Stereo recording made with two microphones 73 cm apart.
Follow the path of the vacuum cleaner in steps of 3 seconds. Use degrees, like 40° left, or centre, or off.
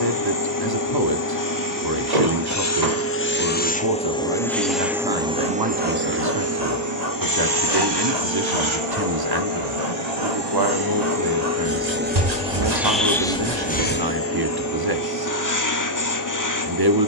20° left, centre, 30° right, 30° right, 10° left, 30° left.